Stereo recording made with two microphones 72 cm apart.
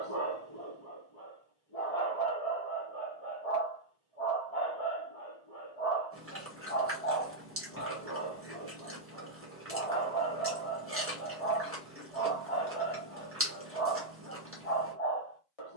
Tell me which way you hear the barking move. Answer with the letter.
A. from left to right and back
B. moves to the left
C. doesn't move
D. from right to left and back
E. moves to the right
C.